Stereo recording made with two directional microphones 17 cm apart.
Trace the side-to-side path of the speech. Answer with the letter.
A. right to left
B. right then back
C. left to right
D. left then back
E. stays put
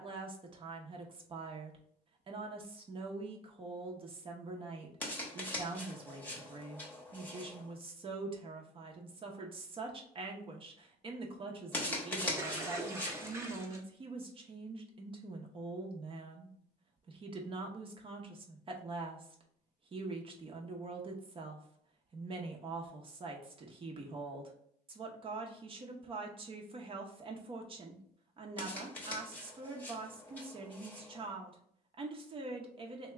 E.